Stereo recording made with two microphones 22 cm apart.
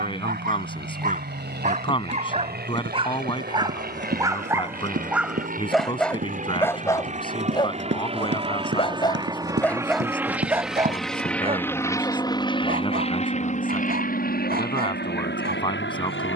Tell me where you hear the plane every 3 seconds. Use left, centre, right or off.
right, right, right, centre, left, left.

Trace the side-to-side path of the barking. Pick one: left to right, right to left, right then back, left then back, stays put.
left then back.